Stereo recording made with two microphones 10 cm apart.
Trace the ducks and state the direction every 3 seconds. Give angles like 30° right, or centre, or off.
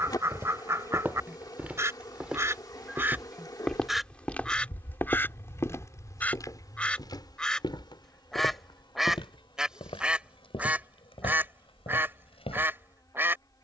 30° right, centre, 10° left, 10° right, 20° right.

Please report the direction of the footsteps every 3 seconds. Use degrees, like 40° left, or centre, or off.
10° right, 20° left, 50° left, 70° left, 80° left.